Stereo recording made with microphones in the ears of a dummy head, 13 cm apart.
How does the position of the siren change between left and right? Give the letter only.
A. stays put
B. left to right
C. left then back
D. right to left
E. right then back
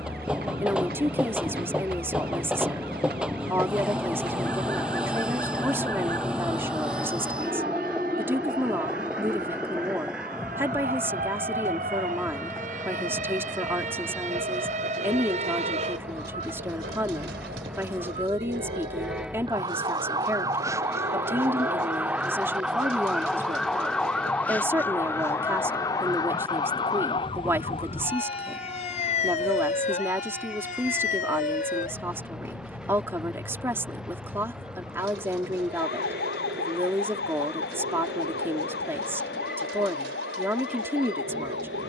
D.